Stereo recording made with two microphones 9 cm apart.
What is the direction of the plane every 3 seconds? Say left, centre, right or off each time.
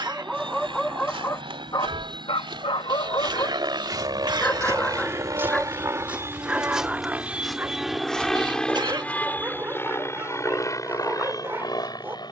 right, right, centre, left.